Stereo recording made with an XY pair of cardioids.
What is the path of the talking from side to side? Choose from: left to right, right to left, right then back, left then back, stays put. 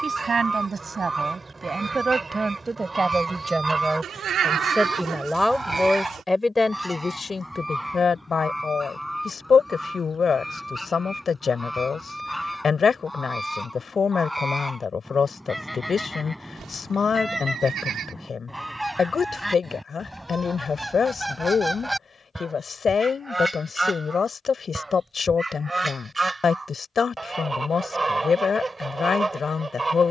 right to left.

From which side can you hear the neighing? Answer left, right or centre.
right.